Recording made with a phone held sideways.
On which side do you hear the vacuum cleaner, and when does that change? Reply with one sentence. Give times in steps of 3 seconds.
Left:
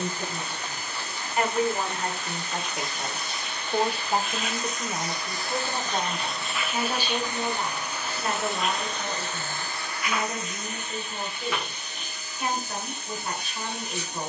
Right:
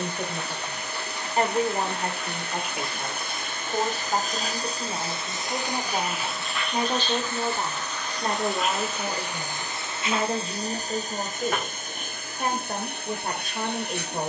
In this clip you hear the vacuum cleaner on the right from 0 s, in the centre from 6 s and on the right from 9 s.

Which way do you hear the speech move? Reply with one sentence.
You can hear the speech move from right to left and back again.